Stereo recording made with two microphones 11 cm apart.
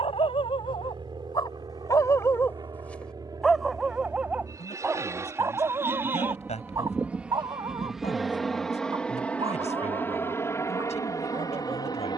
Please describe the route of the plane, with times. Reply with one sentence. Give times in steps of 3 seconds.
You can hear the plane on the right from 0 s, in the centre from 6 s and on the left from 9 s.